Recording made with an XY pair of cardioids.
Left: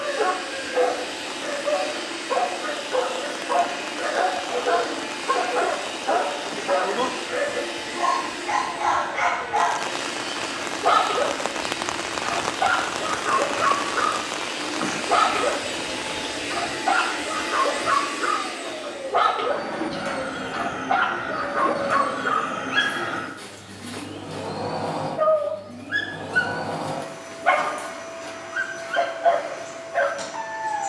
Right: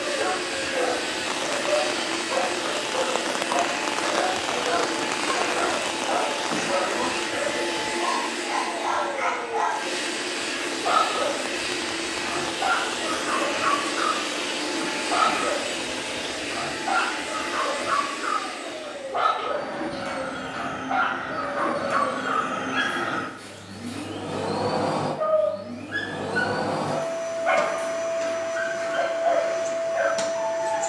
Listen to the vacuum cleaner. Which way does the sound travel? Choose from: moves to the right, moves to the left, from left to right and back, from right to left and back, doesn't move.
from right to left and back.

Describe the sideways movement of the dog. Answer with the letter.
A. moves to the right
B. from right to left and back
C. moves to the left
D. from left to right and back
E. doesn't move
E.